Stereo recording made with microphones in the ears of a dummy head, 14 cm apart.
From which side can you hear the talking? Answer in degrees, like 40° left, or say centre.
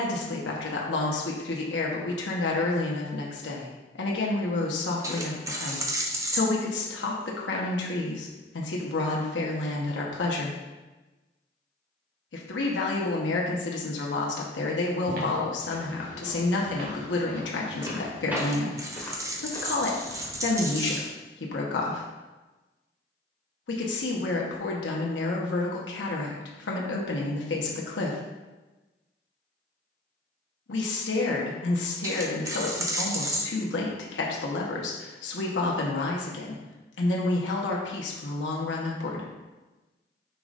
80° left.